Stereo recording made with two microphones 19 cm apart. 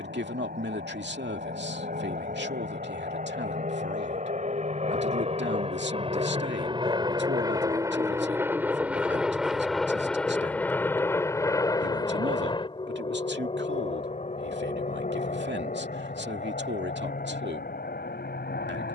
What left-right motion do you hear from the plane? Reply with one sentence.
You can hear the plane travel towards the left.